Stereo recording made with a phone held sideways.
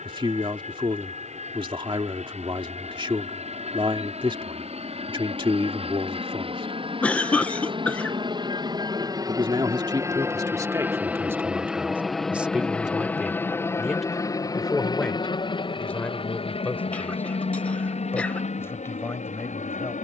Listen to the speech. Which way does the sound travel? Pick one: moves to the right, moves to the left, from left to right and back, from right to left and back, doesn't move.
moves to the left.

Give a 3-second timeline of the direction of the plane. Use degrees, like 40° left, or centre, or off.
60° right, 60° right, 40° right, 20° right, 10° left, 40° left, 50° left.